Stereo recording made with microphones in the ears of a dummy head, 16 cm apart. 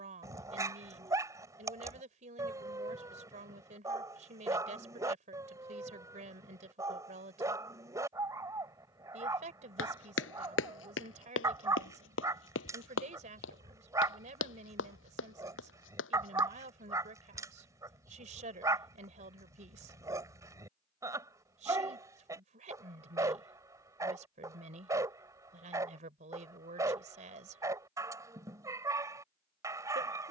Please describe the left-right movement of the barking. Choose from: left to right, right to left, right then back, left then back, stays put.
stays put.